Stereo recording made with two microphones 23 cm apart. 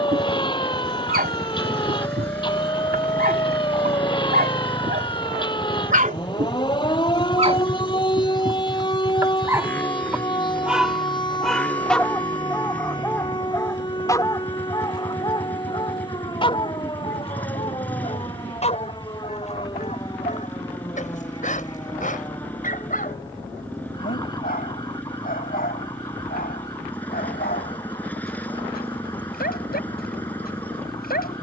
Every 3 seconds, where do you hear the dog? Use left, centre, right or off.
right, right, right, centre, centre, left, left, left, left, left, left.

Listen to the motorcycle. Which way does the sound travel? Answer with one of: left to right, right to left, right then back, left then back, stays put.
stays put.